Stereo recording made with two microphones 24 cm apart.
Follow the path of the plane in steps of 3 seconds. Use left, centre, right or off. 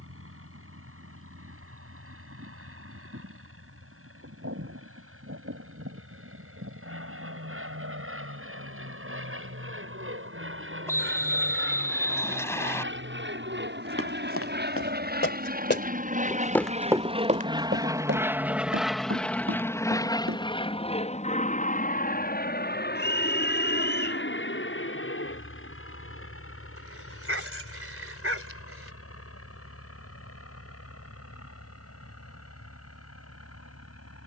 right, right, right, right, right, right, centre, left, left, left, left, left.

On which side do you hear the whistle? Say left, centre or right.
centre.